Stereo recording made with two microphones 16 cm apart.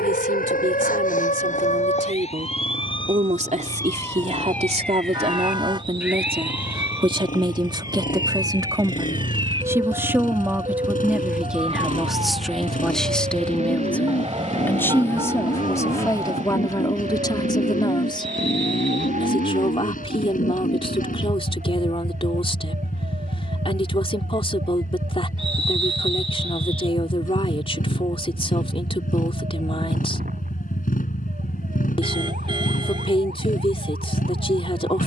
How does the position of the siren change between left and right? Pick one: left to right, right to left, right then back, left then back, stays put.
left to right.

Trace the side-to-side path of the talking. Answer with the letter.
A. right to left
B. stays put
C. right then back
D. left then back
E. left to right
A.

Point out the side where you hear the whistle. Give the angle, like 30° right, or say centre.
30° right.